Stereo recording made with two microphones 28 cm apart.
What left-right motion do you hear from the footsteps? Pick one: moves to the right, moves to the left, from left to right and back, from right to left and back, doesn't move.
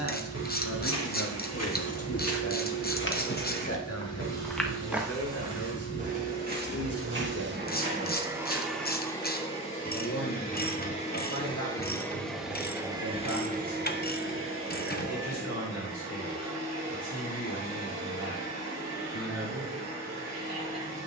moves to the right.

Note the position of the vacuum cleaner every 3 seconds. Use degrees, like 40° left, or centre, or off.
60° right, 60° right, 40° right, 20° left, 30° right, 60° right, 60° right.